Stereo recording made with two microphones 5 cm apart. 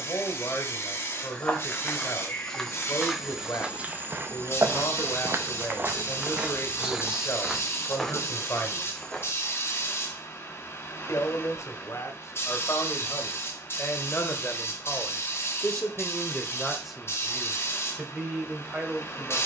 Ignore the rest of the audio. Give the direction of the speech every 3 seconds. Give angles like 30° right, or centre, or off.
70° left, 70° left, 70° left, 60° left, 50° left, centre, 20° right.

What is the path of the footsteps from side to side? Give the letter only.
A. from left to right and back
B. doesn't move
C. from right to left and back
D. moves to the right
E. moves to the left
A.